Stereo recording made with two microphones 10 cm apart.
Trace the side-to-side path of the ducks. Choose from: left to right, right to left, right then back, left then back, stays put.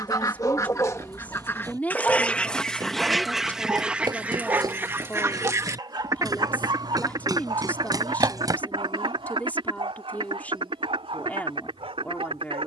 left to right.